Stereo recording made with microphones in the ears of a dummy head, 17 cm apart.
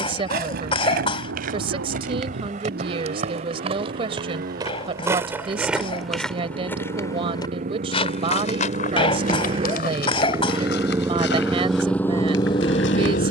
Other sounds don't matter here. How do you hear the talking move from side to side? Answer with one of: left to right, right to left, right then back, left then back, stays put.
stays put.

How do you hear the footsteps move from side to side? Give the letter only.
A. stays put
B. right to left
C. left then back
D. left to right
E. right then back
B.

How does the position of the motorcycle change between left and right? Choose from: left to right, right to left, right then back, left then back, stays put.
right to left.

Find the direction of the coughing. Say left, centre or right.
left.